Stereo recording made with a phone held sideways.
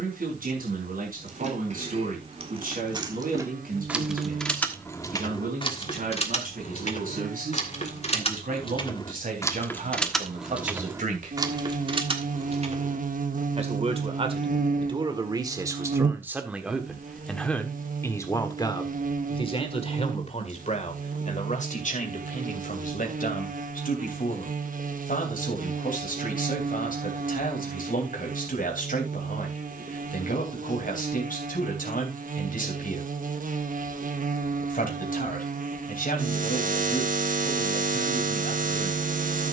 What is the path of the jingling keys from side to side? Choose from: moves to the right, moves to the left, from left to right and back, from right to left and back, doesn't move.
from right to left and back.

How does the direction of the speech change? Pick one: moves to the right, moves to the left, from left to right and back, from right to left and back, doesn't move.
moves to the left.